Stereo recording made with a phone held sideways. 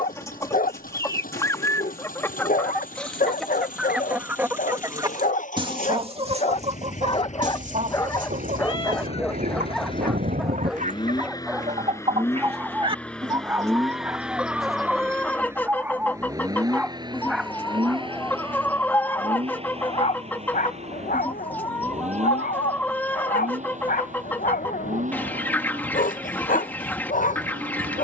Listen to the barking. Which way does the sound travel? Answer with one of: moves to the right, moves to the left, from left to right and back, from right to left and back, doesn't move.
from left to right and back.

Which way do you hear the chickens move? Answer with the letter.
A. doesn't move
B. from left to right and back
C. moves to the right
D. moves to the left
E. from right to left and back
B.